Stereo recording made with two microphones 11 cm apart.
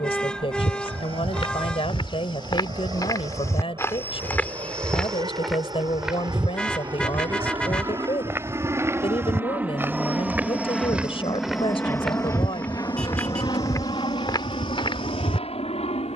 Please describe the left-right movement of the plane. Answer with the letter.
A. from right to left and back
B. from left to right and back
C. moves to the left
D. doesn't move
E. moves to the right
C.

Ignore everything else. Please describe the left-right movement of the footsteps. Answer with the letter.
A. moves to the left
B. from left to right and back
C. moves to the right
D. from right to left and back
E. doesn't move
B.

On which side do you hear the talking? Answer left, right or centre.
left.